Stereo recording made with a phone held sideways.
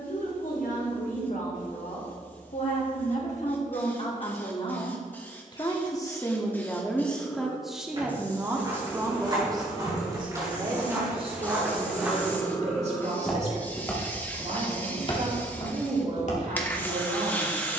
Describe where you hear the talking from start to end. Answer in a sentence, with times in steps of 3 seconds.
In this clip you hear the talking on the left from 0 s, in the centre from 6 s and on the right from 9 s.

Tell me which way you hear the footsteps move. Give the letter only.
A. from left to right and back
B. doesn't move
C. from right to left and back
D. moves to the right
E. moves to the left
E.